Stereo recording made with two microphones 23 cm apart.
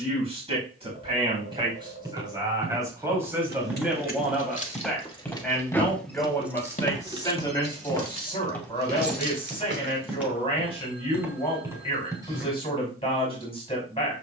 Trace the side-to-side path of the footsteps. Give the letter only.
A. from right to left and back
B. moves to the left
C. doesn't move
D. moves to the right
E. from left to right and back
A.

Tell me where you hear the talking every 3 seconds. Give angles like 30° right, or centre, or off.
20° right, centre, 20° left, 20° left, 20° left.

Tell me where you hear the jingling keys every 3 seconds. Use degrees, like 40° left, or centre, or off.
off, 30° left, 20° right, 50° right, off.